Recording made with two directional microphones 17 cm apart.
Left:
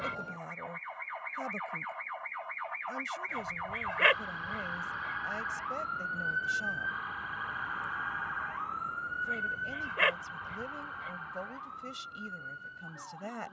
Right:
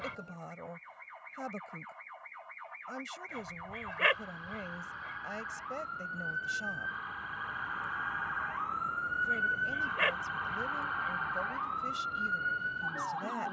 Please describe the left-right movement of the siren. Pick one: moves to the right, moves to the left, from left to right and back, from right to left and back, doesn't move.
moves to the right.